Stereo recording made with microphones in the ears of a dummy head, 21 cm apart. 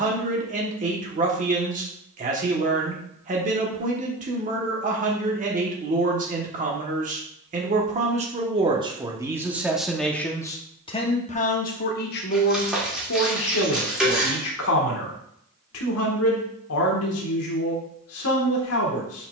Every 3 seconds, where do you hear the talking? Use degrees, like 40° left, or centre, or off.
30° right, 30° right, 30° right, 10° left, 60° left, 70° left, 70° left.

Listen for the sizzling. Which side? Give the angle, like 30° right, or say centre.
centre.